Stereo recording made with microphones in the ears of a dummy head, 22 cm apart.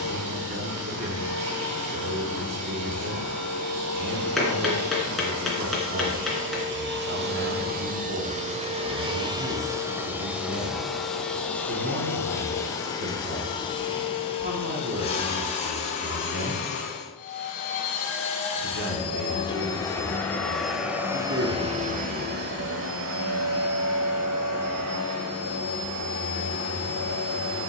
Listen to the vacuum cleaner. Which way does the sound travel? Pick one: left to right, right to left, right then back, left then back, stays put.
left then back.